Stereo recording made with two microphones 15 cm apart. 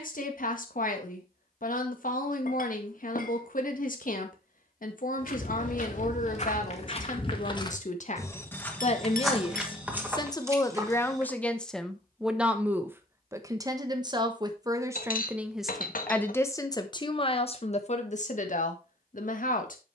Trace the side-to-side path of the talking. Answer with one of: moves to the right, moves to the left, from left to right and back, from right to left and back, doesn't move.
from left to right and back.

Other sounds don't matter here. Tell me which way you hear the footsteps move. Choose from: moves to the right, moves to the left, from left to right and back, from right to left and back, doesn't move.
moves to the right.